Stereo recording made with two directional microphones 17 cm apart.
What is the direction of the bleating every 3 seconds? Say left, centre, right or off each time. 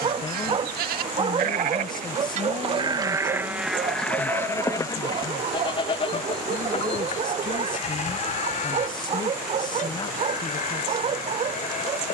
right, centre, left, left.